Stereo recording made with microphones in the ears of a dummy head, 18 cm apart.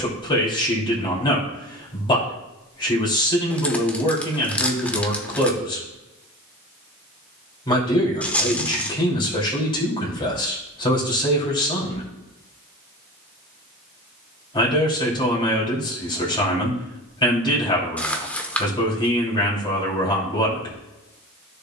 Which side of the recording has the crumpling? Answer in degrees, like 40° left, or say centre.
10° left.